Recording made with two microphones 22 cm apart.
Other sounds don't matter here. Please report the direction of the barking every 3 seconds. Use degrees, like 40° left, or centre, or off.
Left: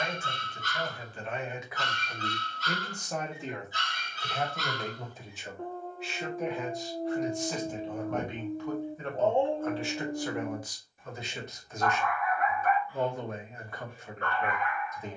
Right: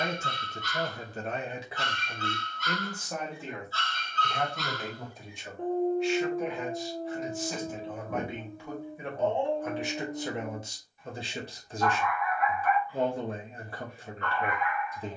40° left, centre, 20° left, 50° left, 50° left.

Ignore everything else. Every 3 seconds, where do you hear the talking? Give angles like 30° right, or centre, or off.
30° right, centre, centre, 20° right, 30° right.